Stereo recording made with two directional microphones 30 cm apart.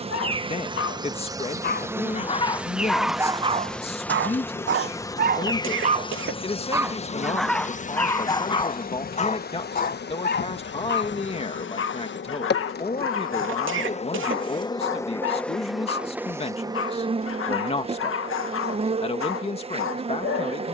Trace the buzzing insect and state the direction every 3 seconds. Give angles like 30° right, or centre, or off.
10° right, 10° left, 20° left, 40° left, 30° left, 10° right, 20° right.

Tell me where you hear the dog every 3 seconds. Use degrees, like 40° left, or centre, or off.
30° left, 30° right, centre, 30° left, 40° left, 40° left, 40° left.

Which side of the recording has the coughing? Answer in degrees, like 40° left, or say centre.
40° right.